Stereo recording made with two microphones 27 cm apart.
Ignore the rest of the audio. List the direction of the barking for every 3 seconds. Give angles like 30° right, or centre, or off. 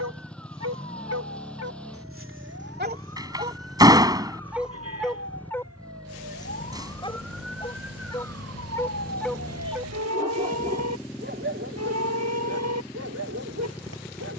60° right, centre, 20° left, 30° right, 70° right.